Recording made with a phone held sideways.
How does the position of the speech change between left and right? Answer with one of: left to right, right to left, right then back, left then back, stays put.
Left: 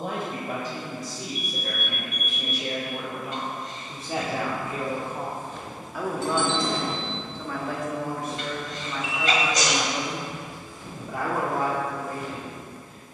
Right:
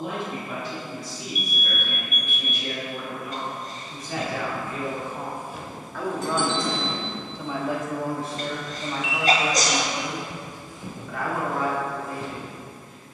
right then back.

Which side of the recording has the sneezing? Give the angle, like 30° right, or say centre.
40° right.